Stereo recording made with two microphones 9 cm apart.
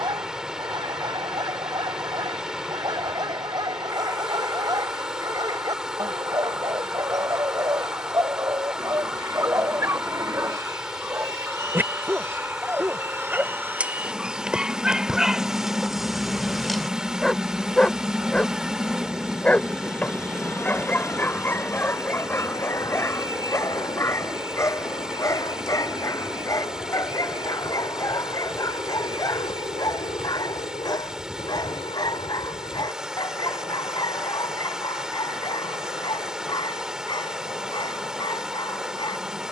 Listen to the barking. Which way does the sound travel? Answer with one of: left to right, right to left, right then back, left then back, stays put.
right to left.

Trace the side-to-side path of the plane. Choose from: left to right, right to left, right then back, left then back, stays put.
right to left.